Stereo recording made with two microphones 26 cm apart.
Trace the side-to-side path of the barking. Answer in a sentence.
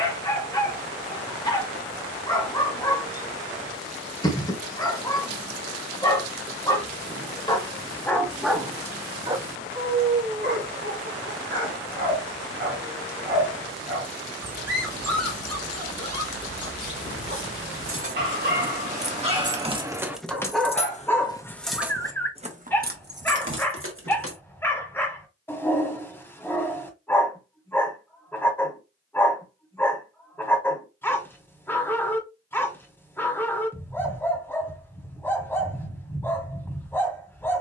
In this clip you hear the barking go right and come back.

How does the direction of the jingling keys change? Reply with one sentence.
You can hear the jingling keys move from right to left and back again.